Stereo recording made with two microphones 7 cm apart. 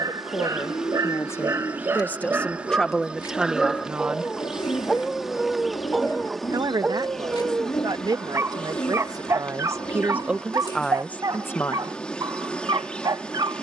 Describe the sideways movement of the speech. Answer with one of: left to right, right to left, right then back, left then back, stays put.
right then back.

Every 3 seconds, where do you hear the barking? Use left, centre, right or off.
right, centre, right, right, right.